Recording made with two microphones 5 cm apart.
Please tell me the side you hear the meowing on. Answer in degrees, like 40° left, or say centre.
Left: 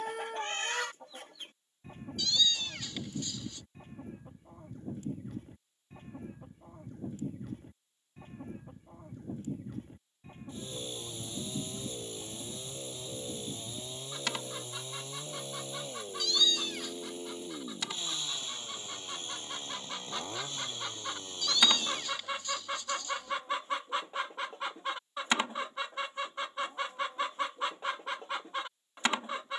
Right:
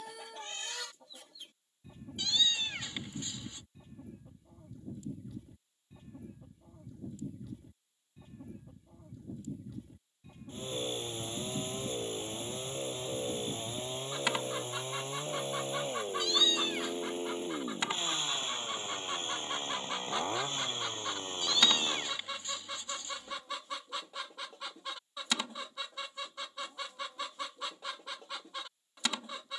30° right.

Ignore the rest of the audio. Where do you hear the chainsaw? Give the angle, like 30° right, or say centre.
40° right.